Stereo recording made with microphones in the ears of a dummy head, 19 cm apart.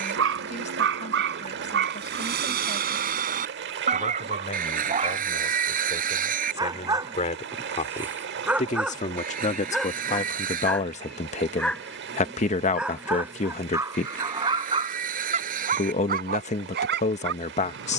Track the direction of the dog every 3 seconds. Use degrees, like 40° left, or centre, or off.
50° right, 30° right, 10° right, centre, 10° right, 50° right.